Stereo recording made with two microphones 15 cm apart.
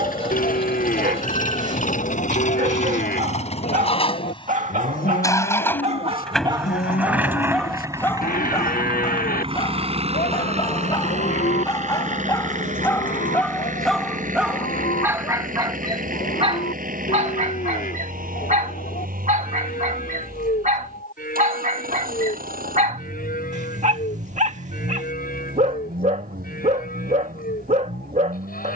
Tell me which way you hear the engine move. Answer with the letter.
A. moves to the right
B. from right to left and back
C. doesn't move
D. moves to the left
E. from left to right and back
A.